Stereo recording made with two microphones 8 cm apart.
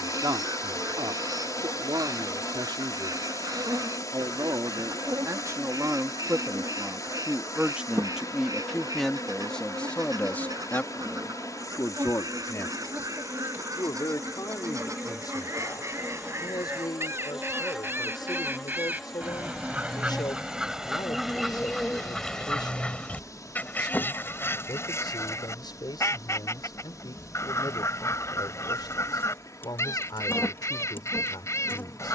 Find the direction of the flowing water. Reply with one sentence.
In this clip you hear the flowing water on the left.